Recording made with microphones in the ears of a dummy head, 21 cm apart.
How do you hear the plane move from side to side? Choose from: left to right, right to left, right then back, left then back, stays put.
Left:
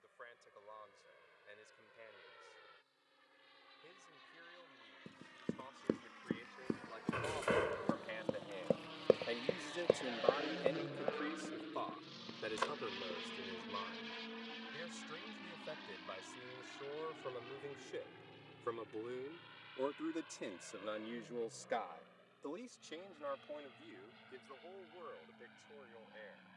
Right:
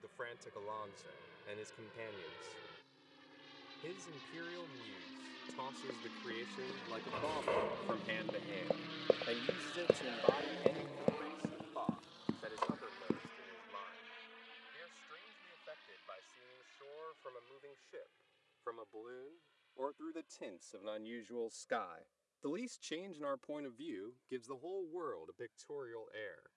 right to left.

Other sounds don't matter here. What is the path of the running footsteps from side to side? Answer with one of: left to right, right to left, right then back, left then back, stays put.
left to right.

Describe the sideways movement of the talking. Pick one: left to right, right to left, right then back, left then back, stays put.
left then back.